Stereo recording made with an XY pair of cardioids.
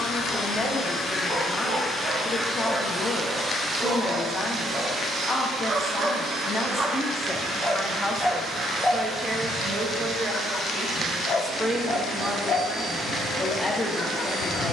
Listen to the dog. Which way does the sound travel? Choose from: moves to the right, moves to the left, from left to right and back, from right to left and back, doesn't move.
moves to the left.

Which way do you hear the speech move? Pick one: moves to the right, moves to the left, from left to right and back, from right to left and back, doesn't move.
from left to right and back.